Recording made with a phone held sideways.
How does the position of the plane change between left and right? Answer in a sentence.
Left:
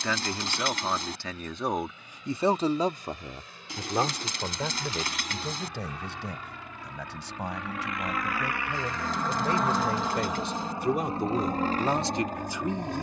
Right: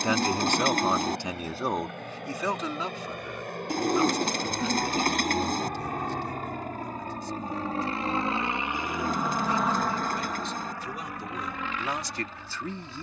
In this clip you hear the plane move to the left.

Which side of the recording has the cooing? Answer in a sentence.
You can hear the cooing on the right.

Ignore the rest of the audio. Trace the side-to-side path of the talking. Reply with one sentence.
In this clip you hear the talking go left and come back.